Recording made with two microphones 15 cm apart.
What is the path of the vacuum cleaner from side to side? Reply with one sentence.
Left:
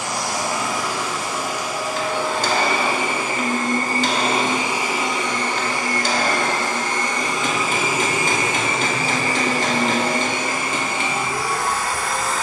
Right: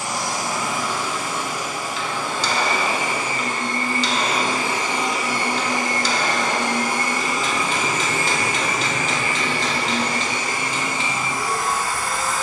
In this clip you hear the vacuum cleaner go right and come back.